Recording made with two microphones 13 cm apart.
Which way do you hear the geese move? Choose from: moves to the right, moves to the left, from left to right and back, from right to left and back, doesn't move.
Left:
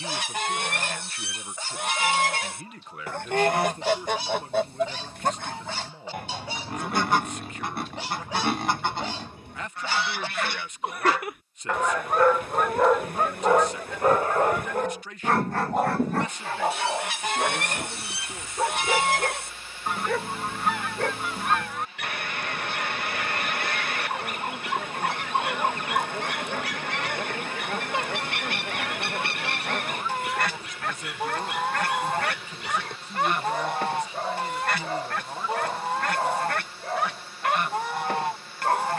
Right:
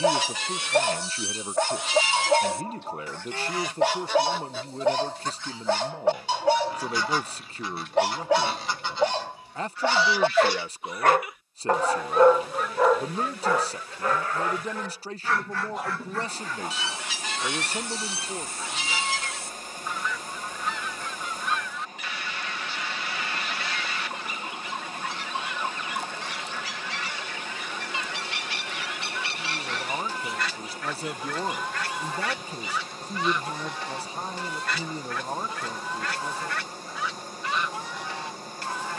doesn't move.